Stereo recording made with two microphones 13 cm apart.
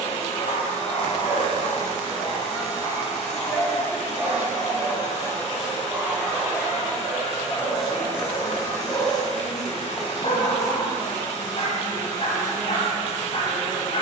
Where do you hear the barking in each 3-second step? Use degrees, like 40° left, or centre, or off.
50° left, 10° left, 10° left, 50° left, 50° left.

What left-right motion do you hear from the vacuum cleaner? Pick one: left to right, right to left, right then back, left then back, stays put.
stays put.